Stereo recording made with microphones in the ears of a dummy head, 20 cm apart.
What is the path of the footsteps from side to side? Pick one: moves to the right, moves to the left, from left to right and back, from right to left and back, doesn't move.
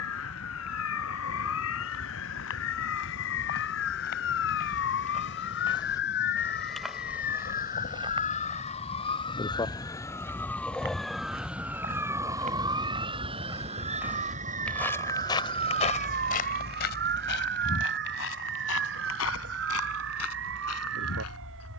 from left to right and back.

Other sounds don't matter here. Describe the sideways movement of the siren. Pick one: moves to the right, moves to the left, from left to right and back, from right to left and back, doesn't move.
moves to the right.